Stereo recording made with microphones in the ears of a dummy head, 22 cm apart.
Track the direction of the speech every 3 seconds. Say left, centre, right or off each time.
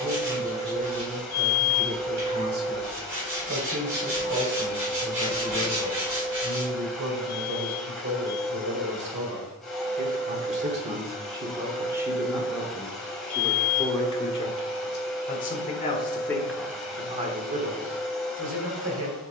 right, right, right, right, centre, centre, right.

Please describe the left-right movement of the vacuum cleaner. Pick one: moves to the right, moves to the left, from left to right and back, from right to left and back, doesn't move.
doesn't move.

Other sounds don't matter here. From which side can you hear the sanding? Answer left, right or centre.
right.